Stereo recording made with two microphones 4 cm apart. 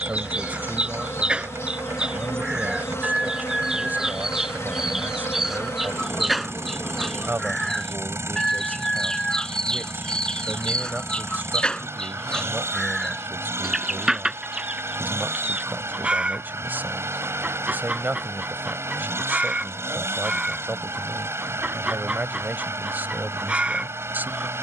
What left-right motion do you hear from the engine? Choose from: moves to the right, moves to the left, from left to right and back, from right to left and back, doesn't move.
doesn't move.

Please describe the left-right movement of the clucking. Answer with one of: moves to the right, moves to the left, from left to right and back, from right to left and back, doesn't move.
from right to left and back.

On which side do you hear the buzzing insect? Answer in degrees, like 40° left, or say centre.
80° left.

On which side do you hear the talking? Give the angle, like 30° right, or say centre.
50° right.